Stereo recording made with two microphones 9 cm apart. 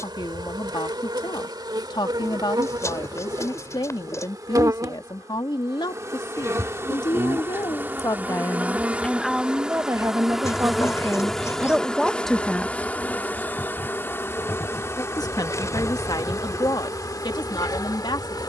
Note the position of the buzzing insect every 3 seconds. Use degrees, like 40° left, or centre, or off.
50° right, 40° right, 30° right, centre, 20° left, 40° left.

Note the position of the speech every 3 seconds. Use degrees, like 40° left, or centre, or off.
60° left, 60° left, 50° left, 20° right, 10° left, 50° left.